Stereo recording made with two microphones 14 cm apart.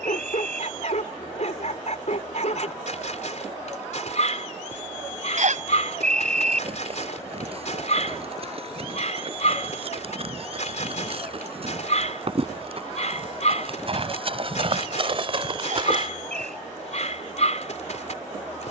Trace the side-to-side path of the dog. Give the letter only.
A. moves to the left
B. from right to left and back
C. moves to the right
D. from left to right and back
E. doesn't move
E.